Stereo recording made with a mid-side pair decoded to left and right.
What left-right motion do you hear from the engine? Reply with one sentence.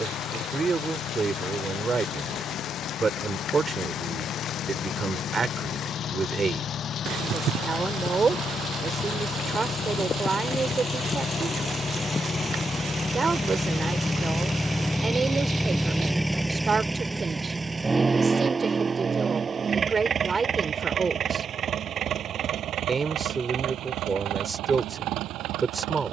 In this clip you hear the engine travel towards the right.